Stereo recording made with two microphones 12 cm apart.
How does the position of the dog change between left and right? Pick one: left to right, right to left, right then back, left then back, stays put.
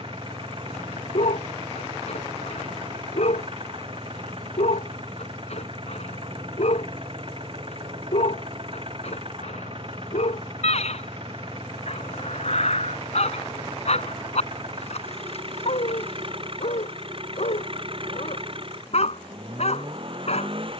stays put.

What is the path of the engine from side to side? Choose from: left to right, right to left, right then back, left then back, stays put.
stays put.